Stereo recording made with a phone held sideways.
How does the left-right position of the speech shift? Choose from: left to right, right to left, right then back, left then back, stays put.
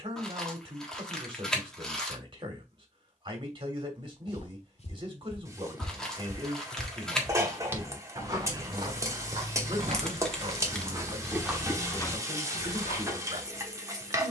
stays put.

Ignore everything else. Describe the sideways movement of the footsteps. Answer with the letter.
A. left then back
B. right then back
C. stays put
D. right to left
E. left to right
B.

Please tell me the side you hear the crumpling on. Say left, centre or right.
centre.